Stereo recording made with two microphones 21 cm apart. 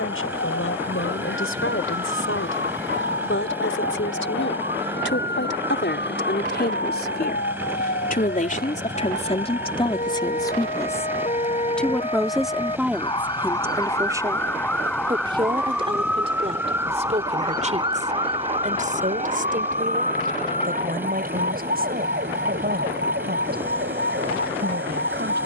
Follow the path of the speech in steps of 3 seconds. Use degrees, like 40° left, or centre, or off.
80° left, 60° left, 50° left, 20° left, 10° right, 30° right, 40° right, 50° right, 50° right.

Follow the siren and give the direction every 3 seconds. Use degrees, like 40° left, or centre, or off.
60° left, 60° left, 50° left, 40° left, 20° left, 10° right, 30° right, 50° right, 60° right.